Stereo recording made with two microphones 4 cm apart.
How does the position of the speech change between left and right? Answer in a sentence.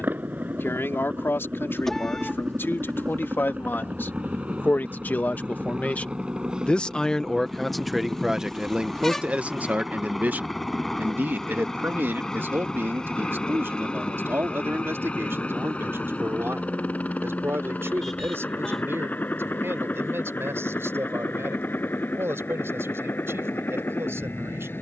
You can hear the speech move to the right.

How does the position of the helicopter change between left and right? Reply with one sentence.
In this clip you hear the helicopter go from the right side to the left.